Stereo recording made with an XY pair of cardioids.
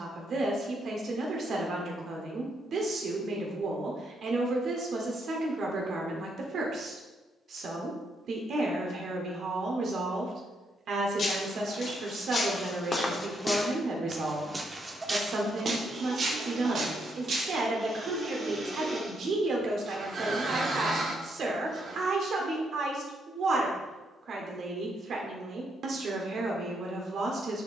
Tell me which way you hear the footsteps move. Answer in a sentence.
You can hear the footsteps move from left to right.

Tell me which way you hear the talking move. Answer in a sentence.
You can hear the talking stay put.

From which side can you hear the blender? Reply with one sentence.
You can hear the blender on the right.